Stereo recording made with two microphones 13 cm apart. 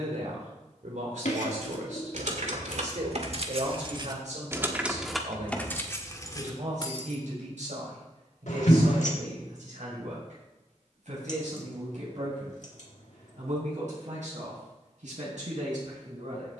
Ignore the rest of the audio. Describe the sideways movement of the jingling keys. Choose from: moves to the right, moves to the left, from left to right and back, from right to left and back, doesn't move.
moves to the left.